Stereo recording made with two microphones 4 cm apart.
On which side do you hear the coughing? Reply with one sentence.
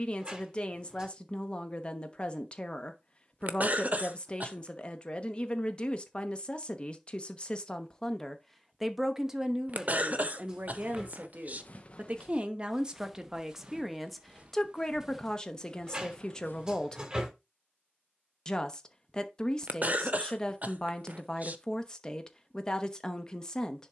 In this clip you hear the coughing on the right.